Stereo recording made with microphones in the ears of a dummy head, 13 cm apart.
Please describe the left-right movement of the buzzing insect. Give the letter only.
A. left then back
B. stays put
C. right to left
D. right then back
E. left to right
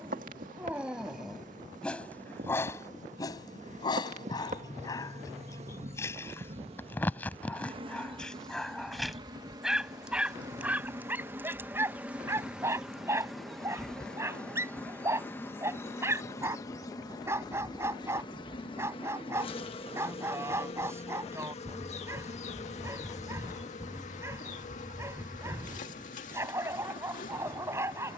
C.